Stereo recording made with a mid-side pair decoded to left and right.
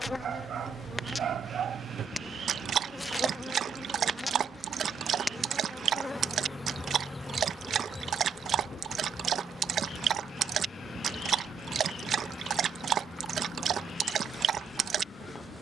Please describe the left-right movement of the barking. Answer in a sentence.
You can hear the barking stay put.